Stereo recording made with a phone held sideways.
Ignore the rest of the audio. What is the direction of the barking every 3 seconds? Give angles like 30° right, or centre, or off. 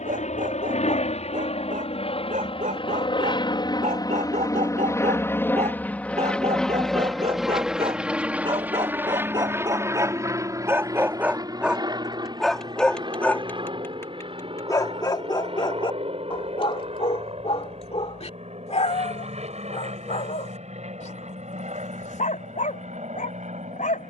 70° right, 60° right, 40° right, 20° right, 10° left, 40° left, 50° left, 60° left.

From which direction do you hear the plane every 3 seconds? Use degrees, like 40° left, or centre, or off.
50° left, 20° left, centre, 20° right, 30° right, 40° right, 40° right, 50° right.